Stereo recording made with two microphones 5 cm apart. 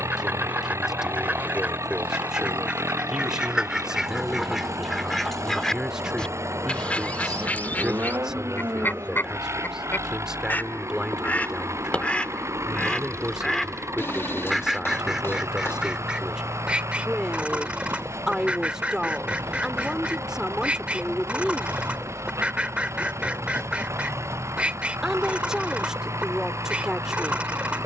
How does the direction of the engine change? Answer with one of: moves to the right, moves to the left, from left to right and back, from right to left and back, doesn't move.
doesn't move.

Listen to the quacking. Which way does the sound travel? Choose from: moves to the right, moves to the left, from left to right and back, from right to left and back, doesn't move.
from right to left and back.